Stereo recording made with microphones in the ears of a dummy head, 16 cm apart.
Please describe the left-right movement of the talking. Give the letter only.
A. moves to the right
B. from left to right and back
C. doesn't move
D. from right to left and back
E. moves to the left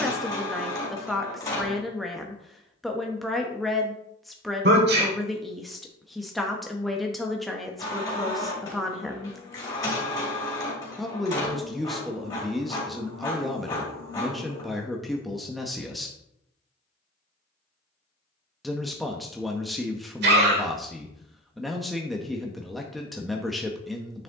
C.